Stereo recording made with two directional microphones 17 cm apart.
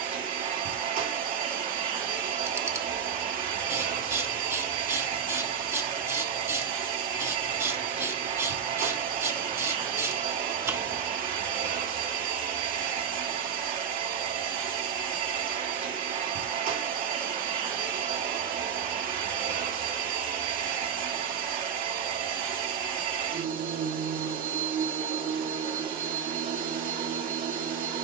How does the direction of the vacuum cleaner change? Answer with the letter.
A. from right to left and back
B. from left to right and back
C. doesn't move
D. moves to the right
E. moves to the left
C.